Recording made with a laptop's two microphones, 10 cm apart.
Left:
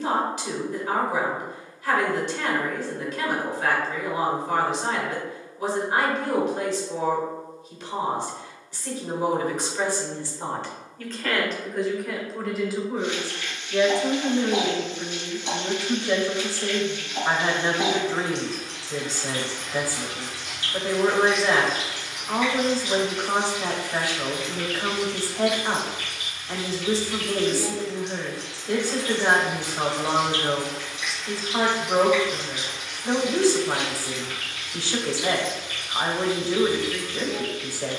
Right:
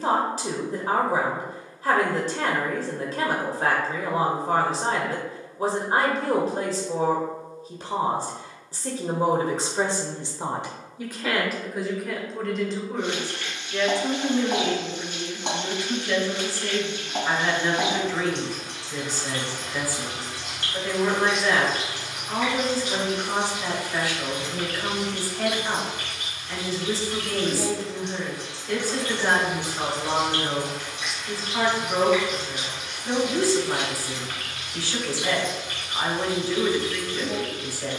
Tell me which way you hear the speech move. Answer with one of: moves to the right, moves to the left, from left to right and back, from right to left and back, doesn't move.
moves to the left.